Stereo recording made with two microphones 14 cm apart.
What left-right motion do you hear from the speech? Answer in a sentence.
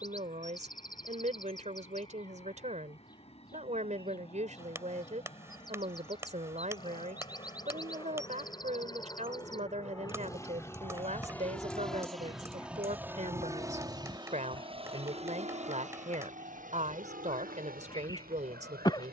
In this clip you hear the speech stay put.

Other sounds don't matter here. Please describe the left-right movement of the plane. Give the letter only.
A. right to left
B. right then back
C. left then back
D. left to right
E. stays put
D.